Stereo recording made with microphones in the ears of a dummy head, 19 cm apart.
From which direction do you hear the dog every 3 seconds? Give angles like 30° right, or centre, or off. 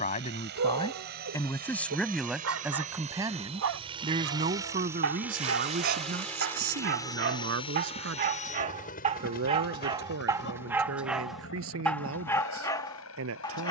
70° right, 60° right, 50° right, 10° right, 10° left.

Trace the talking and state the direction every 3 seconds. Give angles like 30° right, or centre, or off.
10° left, 30° right, 50° right, 60° right, 70° right.